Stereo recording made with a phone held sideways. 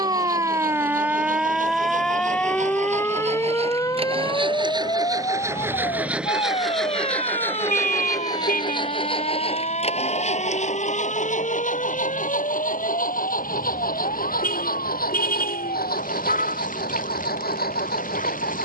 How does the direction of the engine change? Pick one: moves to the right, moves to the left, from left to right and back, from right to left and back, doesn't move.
moves to the left.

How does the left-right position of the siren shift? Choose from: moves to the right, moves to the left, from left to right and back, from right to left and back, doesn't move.
moves to the left.